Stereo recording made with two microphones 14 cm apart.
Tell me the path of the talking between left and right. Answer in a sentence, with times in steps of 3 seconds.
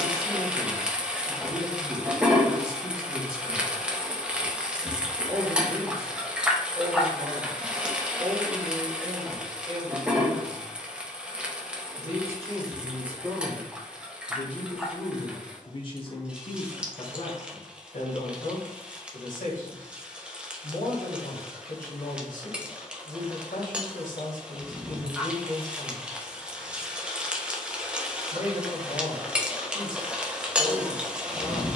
You can hear the talking on the right from 0 s, in the centre from 12 s and on the left from 15 s.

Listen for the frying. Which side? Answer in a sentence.
You can hear the frying in the centre.